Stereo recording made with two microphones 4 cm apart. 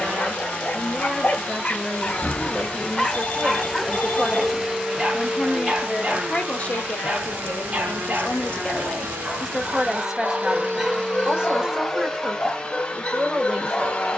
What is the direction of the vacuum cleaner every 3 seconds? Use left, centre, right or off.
left, centre, right, right, left.